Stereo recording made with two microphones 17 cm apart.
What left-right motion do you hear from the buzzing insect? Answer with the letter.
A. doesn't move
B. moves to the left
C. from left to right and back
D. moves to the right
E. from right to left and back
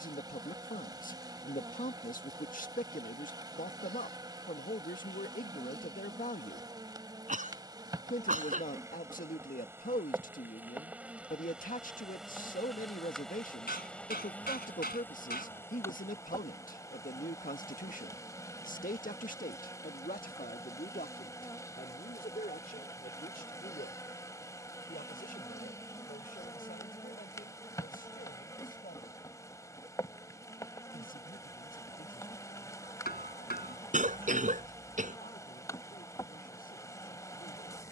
B.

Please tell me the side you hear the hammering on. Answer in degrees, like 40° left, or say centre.
70° left.